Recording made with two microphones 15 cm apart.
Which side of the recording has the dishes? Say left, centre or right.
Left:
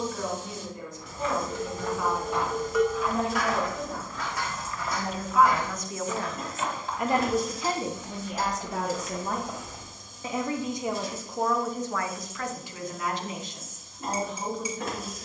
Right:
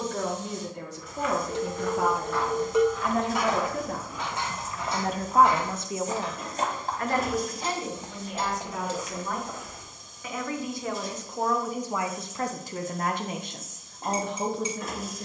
right.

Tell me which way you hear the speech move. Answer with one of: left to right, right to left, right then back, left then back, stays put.
left then back.